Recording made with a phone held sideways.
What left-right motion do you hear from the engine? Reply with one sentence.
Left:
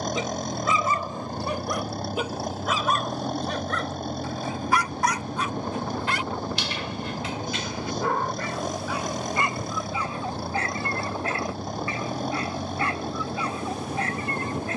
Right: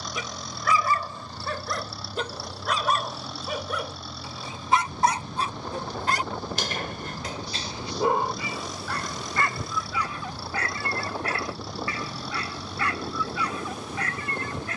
In this clip you hear the engine stay in one place.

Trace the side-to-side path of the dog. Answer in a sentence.
In this clip you hear the dog move from left to right and back again.